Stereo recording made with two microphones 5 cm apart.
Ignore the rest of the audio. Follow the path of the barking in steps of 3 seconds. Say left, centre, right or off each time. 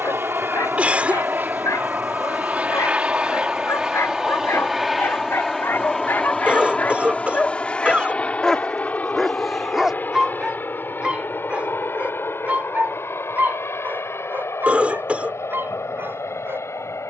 left, left, left, centre, right, right.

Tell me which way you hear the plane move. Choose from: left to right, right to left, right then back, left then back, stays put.
right to left.